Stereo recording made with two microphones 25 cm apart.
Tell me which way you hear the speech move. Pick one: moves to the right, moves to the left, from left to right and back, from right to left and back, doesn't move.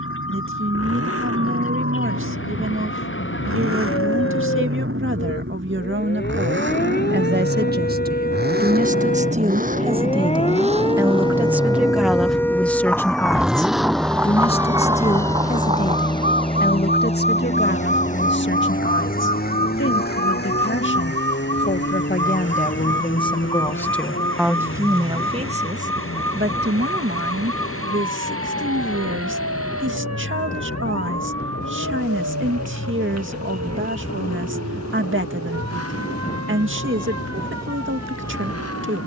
from right to left and back.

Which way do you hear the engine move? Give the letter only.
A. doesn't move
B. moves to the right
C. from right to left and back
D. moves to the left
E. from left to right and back
D.